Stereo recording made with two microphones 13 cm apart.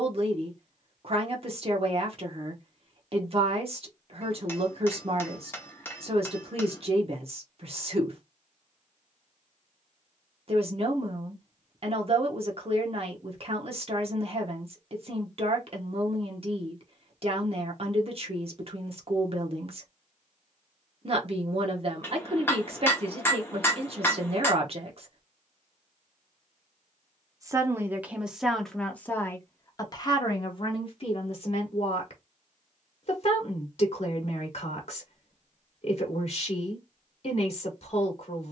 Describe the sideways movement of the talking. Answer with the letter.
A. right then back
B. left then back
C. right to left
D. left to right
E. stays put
C.